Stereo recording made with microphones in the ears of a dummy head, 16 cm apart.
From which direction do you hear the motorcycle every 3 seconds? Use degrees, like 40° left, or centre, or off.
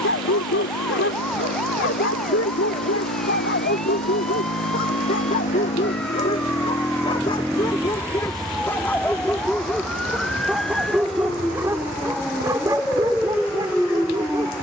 70° left, 50° left, centre, 50° right, 60° right.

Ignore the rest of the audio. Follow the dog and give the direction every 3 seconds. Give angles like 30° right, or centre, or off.
70° left, 50° left, 20° left, centre, 20° right.